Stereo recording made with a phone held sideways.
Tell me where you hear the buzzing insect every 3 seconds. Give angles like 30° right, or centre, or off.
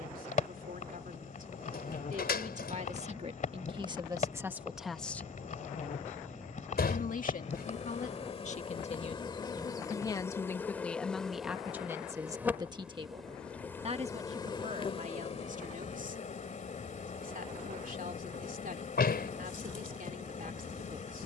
50° left, 50° left, 40° left, 10° left, 10° left, 50° left, 50° left.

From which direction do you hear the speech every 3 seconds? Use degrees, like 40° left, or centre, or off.
60° right, 20° right, 50° left, 10° left, 40° right, 60° right, 60° right.